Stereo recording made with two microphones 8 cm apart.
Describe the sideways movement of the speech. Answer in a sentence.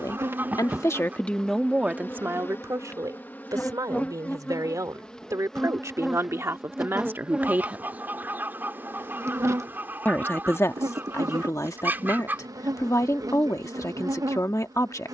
In this clip you hear the speech move from left to right and back again.